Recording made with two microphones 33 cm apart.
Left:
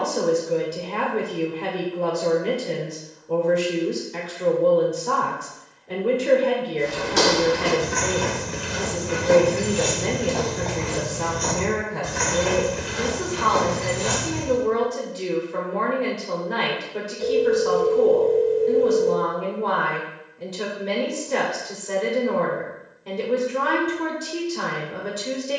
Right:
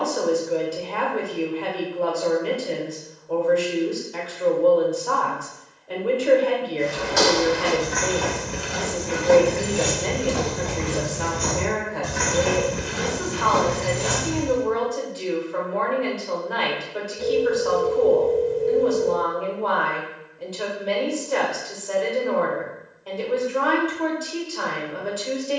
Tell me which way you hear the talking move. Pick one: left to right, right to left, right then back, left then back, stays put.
stays put.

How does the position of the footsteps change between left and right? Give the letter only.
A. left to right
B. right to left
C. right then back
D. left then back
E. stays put
A.